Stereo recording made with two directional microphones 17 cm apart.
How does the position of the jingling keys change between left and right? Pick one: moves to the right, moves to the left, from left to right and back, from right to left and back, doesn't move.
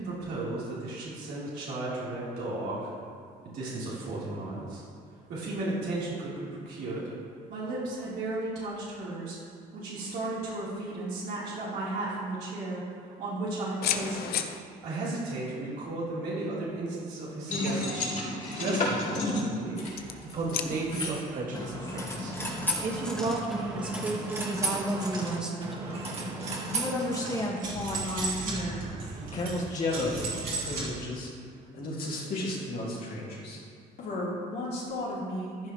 moves to the right.